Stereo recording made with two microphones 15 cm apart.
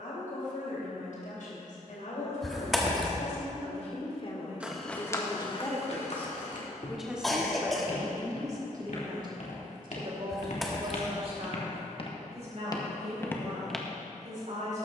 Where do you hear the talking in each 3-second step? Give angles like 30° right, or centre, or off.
70° left, 40° left, 10° right, 40° right, 60° right.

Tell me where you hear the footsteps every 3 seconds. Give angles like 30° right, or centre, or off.
off, 30° left, 70° left, 60° left, 20° left.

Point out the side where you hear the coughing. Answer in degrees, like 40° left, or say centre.
centre.